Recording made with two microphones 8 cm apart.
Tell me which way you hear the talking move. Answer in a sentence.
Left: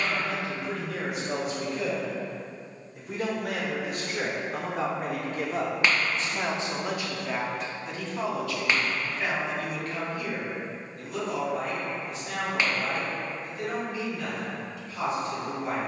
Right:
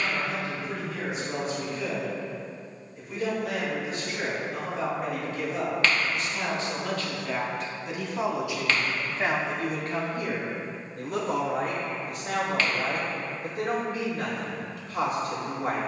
In this clip you hear the talking go from the left side to the right.